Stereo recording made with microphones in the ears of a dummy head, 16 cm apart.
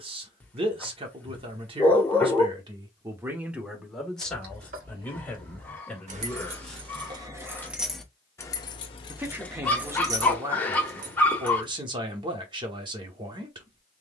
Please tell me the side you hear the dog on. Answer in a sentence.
You can hear the dog in the centre.